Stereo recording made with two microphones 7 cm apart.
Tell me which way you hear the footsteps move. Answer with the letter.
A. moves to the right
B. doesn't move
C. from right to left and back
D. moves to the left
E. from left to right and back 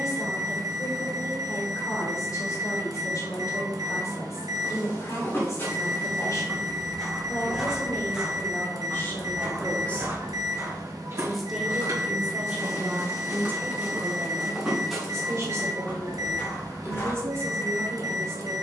E.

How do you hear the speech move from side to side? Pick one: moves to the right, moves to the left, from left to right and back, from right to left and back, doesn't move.
moves to the right.